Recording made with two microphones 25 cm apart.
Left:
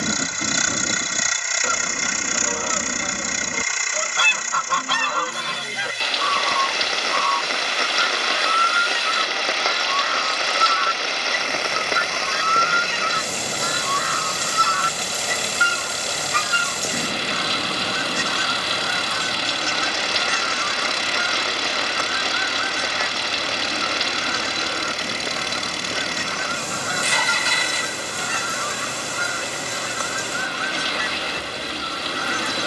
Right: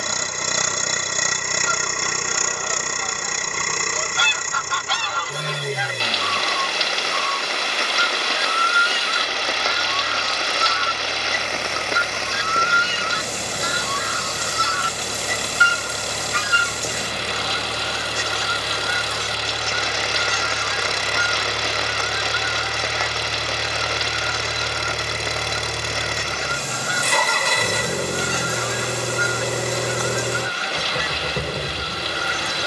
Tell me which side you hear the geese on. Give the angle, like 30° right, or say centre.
60° left.